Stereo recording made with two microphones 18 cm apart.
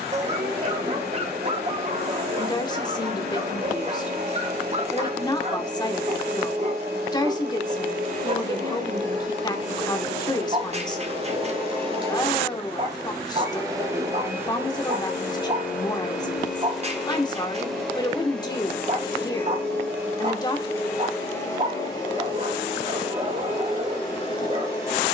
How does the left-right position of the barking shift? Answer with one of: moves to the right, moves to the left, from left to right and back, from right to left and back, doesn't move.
doesn't move.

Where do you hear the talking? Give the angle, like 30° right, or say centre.
20° left.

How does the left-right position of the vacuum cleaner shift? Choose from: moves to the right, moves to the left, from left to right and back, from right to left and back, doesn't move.
moves to the left.